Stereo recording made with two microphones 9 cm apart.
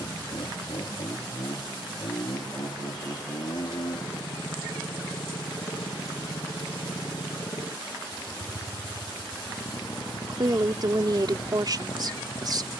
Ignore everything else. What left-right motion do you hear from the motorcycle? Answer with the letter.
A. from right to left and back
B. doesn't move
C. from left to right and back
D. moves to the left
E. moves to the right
B.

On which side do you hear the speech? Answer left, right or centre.
right.